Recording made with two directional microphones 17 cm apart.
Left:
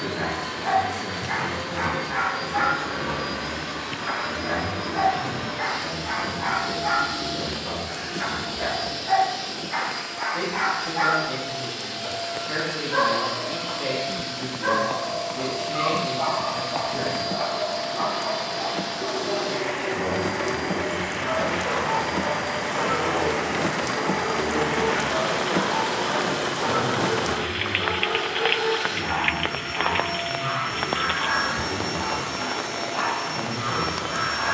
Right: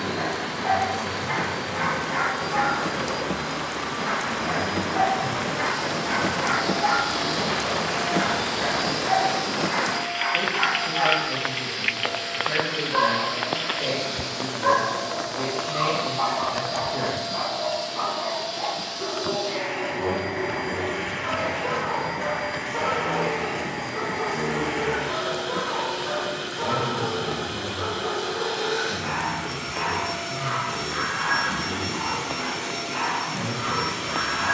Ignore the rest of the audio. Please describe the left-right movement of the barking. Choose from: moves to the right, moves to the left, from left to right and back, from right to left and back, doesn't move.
from right to left and back.